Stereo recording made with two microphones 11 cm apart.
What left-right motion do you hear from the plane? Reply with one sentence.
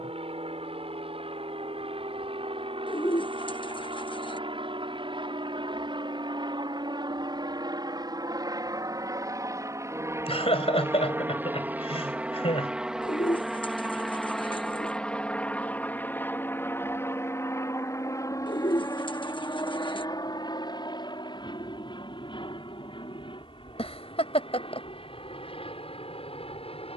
You can hear the plane go from the right side to the left.